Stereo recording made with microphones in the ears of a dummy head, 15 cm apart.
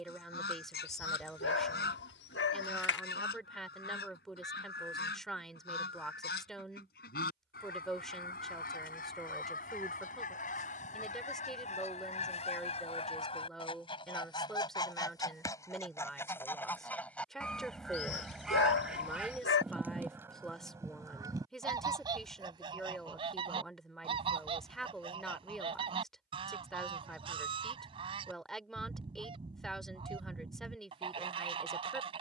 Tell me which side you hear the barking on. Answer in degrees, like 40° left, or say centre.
70° left.